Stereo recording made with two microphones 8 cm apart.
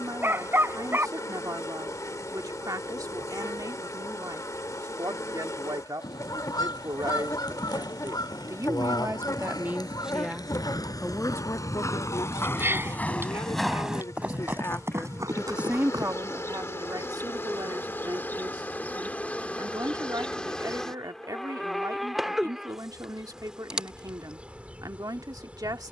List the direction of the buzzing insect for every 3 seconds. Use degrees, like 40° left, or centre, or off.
50° left, 50° left, 50° left, 50° left, 50° left, 40° left, 20° left, centre, 20° right.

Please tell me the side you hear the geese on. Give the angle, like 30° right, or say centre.
70° left.